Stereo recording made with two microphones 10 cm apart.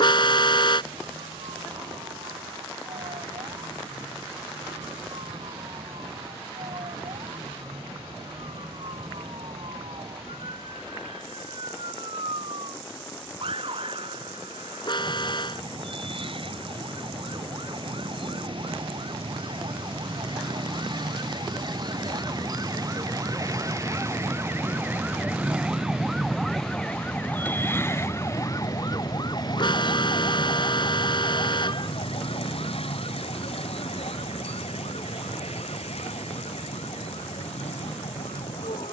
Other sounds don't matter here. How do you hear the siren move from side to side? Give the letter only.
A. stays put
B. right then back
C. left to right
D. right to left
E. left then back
D.